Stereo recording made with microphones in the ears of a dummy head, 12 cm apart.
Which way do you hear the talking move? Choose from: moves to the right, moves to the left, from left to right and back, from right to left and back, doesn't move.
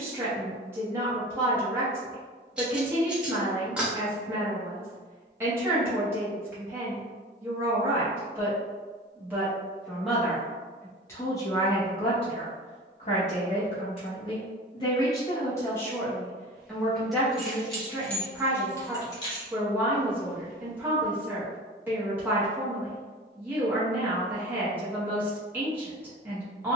from right to left and back.